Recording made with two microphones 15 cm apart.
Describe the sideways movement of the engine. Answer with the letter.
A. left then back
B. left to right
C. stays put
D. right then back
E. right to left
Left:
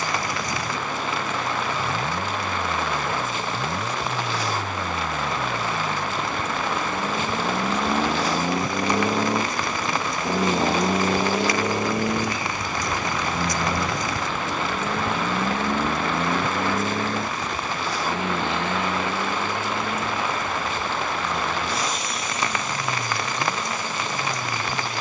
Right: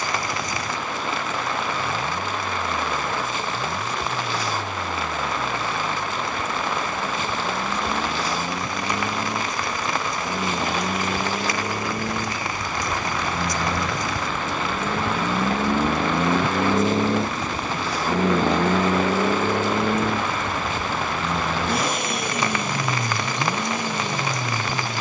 B.